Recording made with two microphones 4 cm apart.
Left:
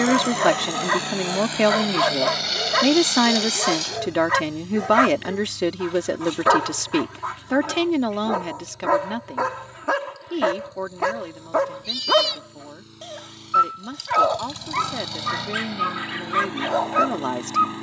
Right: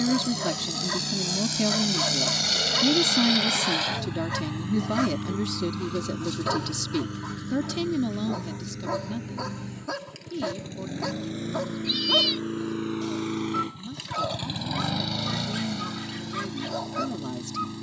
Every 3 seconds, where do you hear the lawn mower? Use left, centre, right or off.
left, right, right, right, right, left.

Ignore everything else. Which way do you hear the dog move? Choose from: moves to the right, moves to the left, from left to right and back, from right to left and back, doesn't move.
doesn't move.